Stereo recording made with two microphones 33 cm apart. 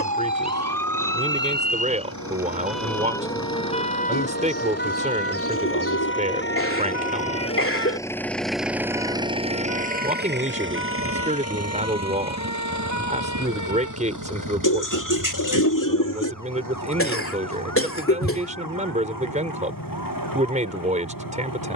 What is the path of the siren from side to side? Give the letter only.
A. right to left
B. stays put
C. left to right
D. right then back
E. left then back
A.